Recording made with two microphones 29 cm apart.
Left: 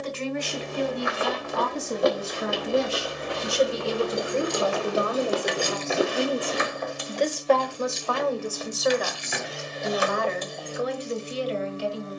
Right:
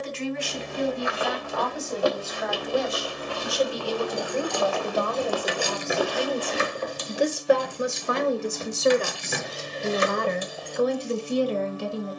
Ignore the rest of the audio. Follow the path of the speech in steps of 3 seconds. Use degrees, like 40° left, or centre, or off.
40° left, 20° left, 10° right, 50° right.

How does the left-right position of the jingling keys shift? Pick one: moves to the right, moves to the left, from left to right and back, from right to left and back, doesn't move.
from left to right and back.